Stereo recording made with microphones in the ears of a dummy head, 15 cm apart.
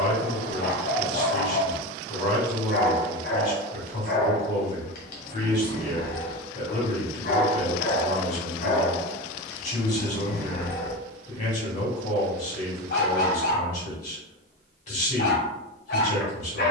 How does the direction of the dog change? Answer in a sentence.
You can hear the dog stay put.